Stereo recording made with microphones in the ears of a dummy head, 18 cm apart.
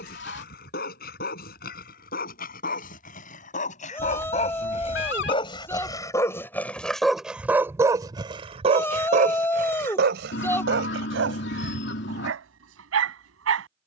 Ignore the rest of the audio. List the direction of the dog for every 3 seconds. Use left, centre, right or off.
left, left, centre, right, right.